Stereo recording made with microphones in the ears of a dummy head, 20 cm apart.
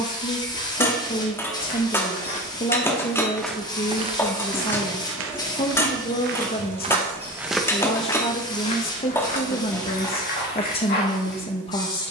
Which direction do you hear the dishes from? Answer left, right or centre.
centre.